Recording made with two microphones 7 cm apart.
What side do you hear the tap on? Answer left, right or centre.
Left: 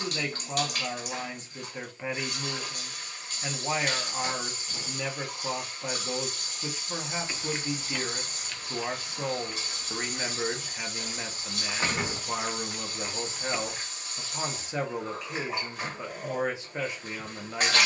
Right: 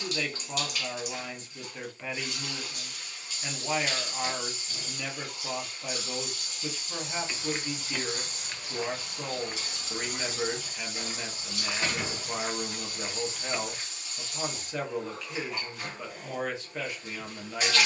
left.